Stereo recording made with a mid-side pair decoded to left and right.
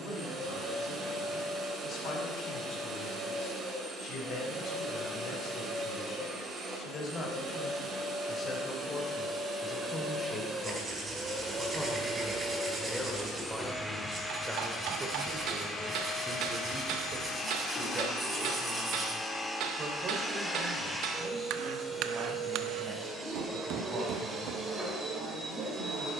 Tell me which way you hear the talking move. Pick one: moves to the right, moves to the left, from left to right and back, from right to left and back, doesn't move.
moves to the right.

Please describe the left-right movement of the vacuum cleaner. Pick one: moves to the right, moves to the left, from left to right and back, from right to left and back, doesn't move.
from right to left and back.